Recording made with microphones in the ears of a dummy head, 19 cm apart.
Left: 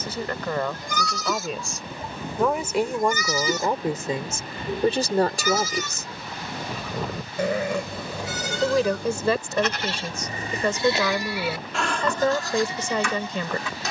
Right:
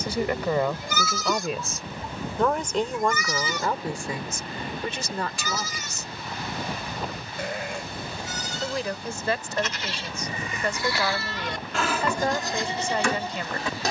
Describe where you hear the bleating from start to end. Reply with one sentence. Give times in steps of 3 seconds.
In this clip you hear the bleating in the centre from 0 s, on the left from 3 s and on the right from 12 s.